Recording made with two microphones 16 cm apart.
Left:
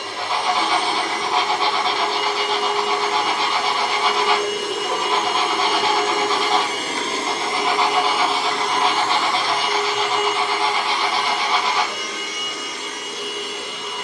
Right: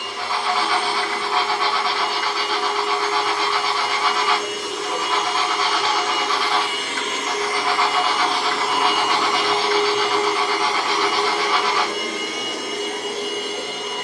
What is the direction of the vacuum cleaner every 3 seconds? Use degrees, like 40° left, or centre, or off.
80° left, 70° left, 20° left, 40° right, 60° right.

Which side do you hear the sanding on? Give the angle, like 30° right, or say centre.
30° left.